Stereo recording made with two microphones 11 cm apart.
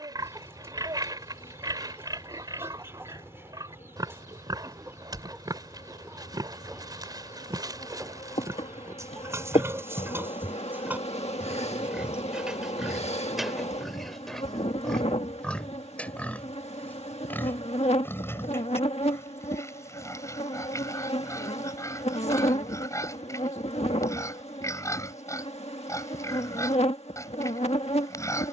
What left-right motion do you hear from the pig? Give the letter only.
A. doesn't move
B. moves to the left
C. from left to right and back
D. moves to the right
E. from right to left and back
B.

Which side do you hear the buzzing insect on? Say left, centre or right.
left.